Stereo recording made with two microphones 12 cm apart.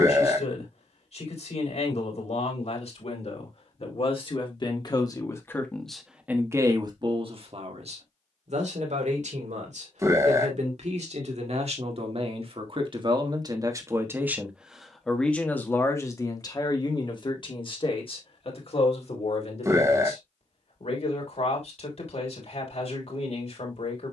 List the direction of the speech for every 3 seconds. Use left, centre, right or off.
left, left, right, right, right, left, left, left.